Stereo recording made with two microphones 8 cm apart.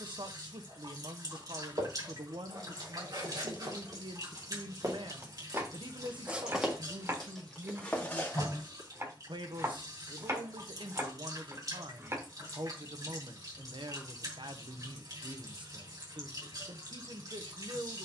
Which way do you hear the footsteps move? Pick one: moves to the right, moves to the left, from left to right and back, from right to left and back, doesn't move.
moves to the left.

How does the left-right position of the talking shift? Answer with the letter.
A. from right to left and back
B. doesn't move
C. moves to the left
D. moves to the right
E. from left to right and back
B.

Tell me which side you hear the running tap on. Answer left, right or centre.
right.